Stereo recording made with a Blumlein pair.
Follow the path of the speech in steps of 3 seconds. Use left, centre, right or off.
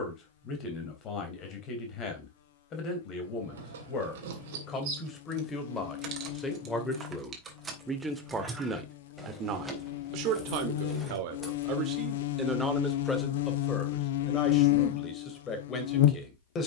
left, left, centre, right, centre, left.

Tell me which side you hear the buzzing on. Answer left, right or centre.
left.